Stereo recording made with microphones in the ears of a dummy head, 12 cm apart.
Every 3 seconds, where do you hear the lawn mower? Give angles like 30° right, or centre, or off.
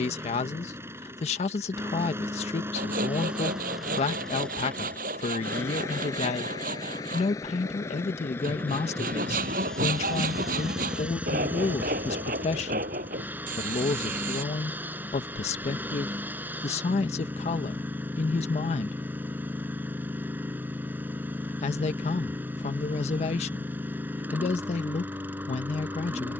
20° right, 10° left, 20° left, centre, 10° right, 10° right, 10° right, 10° right, 10° right.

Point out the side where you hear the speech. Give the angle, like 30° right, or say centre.
50° left.